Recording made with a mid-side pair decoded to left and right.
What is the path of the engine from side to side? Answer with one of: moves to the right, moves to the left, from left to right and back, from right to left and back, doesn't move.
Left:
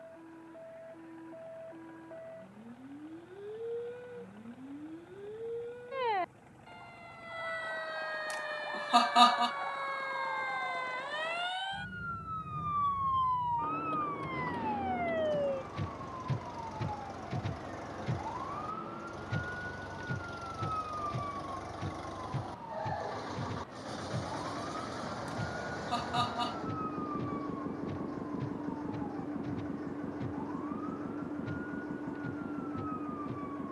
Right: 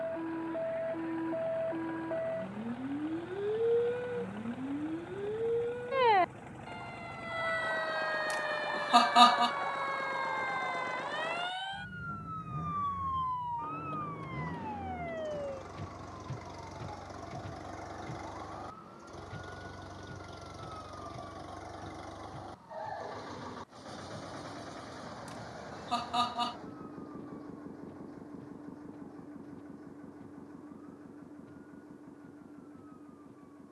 moves to the left.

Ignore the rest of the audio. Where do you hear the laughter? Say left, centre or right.
centre.